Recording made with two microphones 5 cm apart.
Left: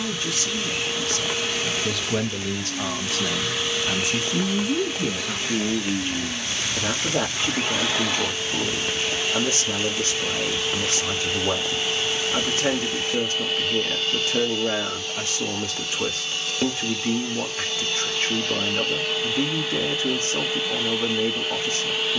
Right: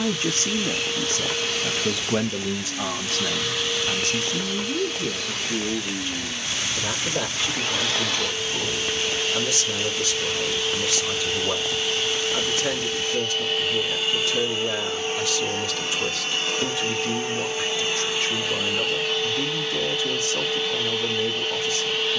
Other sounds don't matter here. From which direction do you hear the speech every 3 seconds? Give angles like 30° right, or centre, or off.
20° right, 20° left, 40° left, 40° left, 40° left, 40° left, 40° left, 40° left.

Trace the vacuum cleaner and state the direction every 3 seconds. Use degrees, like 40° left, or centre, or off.
10° left, 10° left, 10° left, 10° left, centre, 30° right, centre, 10° left.